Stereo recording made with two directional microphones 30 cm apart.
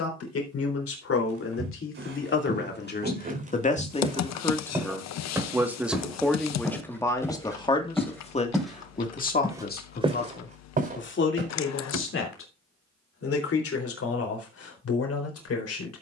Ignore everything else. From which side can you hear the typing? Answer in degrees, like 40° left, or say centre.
60° left.